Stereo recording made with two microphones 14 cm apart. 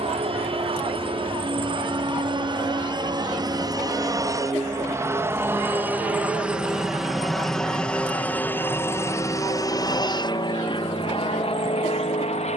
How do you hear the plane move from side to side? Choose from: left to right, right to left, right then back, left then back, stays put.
right to left.